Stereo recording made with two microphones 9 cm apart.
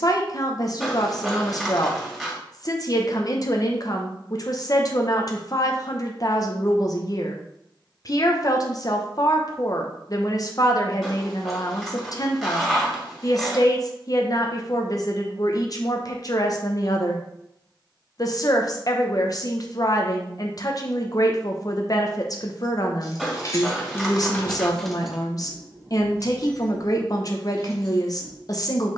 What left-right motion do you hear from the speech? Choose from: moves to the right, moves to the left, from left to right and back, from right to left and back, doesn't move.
doesn't move.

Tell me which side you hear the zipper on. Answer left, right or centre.
centre.